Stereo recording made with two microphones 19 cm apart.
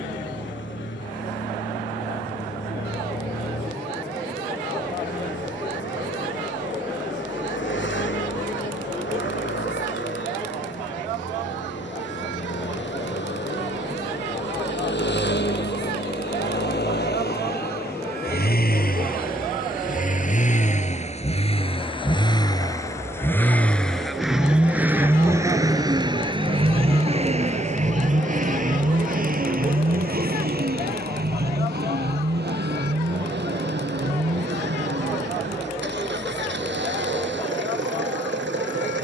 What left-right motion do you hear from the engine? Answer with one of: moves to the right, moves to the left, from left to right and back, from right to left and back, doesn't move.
moves to the right.